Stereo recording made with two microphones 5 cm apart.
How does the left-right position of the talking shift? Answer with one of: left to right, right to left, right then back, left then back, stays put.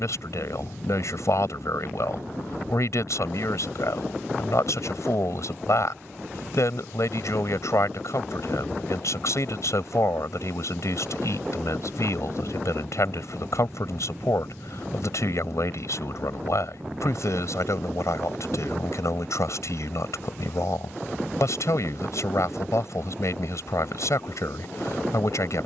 stays put.